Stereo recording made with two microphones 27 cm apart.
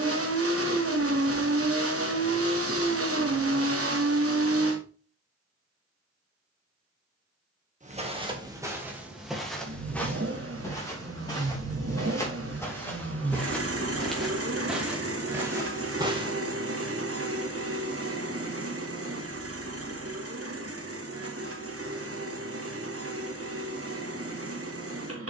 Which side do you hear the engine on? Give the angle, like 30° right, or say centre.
60° right.